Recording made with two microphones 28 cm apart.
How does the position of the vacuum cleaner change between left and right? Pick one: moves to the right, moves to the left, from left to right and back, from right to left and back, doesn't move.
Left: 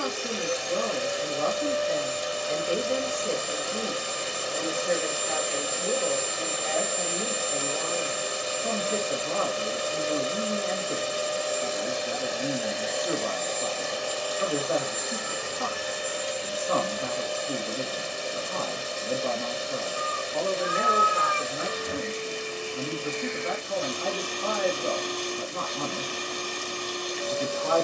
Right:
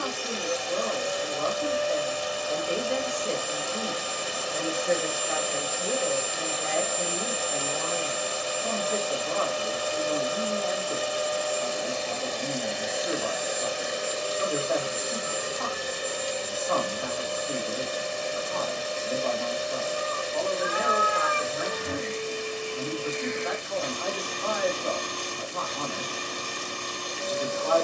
moves to the right.